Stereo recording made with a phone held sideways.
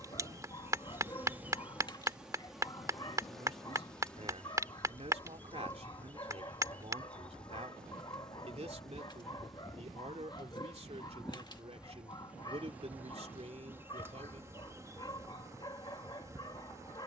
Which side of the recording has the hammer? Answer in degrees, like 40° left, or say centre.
20° right.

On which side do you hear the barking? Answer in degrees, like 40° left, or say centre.
30° left.